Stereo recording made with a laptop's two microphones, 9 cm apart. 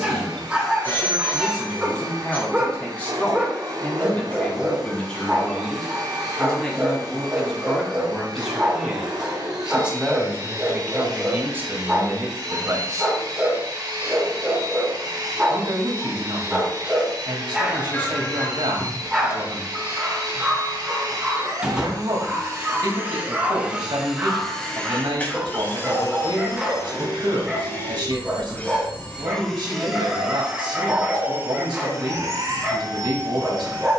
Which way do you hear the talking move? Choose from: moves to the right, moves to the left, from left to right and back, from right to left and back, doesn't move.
moves to the right.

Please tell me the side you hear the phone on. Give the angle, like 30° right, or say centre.
20° left.